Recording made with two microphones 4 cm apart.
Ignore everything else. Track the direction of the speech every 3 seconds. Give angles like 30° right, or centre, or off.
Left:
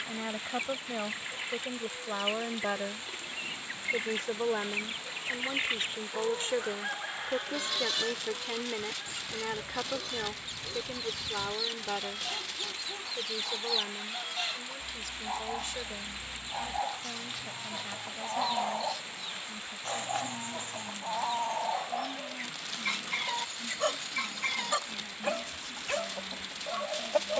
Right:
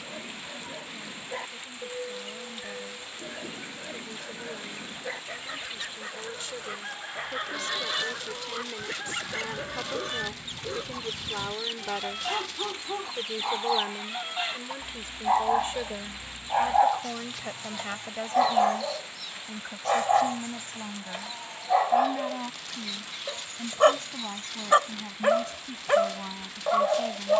60° left, 50° left, 30° left, centre, 20° right, 30° right, 40° right, 50° right, 50° right.